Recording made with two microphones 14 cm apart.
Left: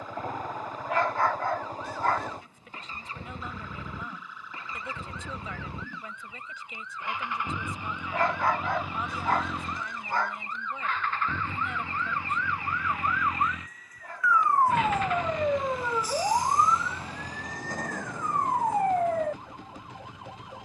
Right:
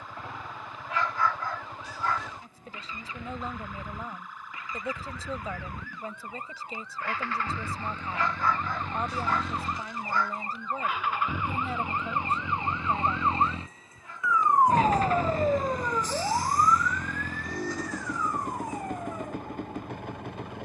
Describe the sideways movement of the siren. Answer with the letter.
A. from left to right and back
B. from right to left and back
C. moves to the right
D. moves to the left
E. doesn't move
D.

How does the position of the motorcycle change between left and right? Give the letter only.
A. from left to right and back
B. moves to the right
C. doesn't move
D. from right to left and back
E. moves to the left
B.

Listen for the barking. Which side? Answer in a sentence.
In this clip you hear the barking on the left.